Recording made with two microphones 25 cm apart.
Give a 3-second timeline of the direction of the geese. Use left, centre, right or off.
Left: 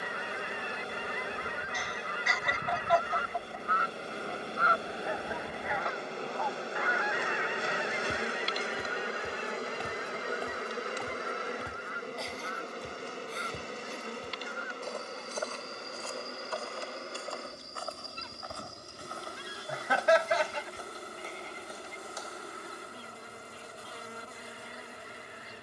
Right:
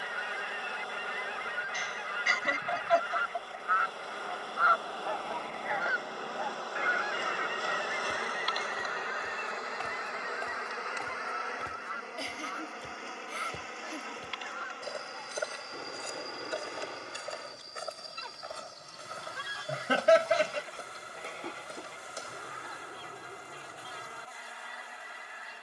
left, left, right, right, right, right, right, right, right.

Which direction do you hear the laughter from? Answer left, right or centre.
right.